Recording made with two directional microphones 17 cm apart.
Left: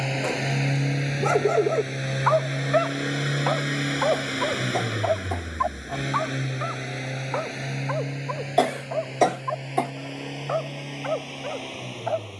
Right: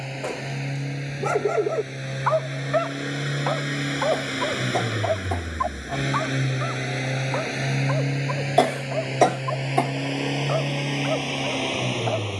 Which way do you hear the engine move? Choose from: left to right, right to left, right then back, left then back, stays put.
left to right.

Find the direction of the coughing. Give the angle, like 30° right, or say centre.
10° right.